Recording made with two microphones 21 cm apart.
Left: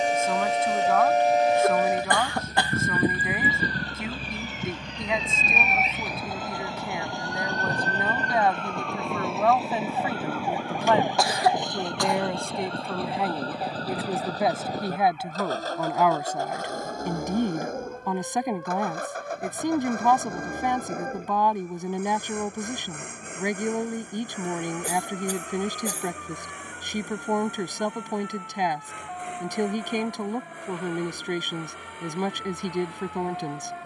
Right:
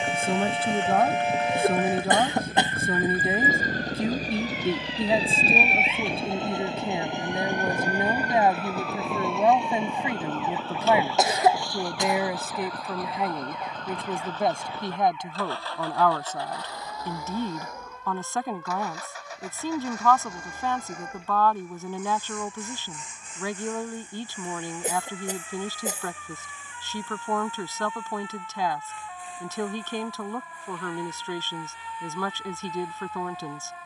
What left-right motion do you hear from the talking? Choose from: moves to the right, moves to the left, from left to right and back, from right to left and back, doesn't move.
moves to the left.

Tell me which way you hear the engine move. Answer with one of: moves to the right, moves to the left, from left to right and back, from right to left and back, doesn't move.
moves to the left.